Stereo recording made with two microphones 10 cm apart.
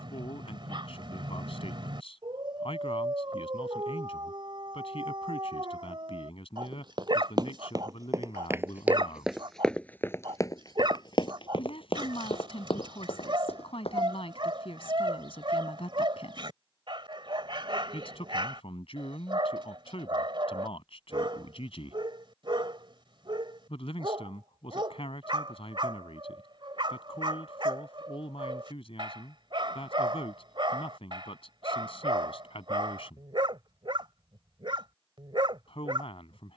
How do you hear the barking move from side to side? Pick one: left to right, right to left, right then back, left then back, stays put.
stays put.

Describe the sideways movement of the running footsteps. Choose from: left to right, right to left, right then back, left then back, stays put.
right to left.